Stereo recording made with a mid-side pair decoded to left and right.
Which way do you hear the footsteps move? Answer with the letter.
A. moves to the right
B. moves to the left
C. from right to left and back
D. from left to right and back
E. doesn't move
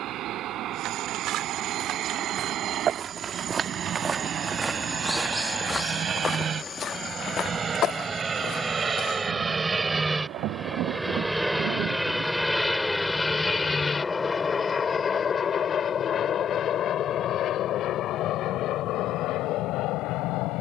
B.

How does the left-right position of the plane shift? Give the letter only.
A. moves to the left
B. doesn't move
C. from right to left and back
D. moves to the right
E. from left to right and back
A.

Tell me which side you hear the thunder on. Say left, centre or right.
right.